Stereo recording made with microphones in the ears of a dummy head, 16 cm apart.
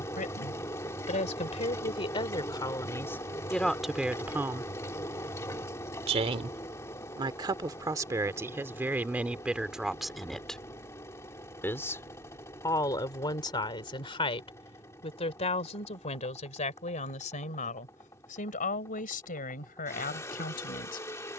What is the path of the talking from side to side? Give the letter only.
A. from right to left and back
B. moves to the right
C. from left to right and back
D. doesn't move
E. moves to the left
C.